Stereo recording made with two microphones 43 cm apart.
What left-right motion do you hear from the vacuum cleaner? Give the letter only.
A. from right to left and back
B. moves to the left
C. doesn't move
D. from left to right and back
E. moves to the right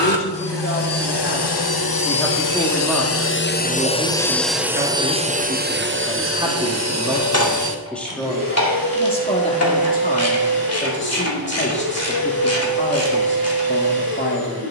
E.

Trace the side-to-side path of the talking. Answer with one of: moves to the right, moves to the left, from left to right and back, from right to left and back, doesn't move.
from left to right and back.